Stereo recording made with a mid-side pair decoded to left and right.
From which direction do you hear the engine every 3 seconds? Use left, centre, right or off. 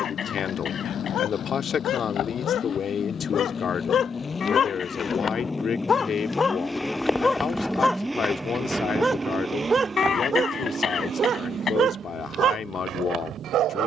left, left, centre, right, right.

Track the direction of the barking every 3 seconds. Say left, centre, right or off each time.
left, left, centre, right, right.